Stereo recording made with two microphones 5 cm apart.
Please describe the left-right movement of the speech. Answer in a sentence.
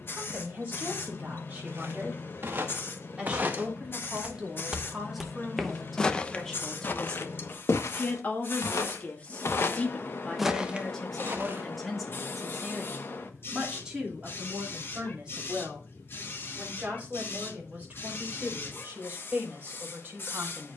You can hear the speech move from right to left and back again.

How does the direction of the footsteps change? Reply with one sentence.
In this clip you hear the footsteps move from right to left and back again.